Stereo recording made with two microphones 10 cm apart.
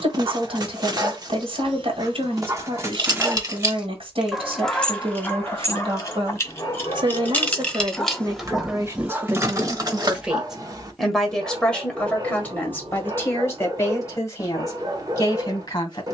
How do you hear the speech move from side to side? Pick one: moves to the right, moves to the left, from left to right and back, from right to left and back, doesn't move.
moves to the left.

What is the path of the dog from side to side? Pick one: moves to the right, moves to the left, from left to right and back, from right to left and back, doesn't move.
from right to left and back.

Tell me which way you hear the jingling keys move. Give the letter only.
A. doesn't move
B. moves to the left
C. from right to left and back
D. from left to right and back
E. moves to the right
C.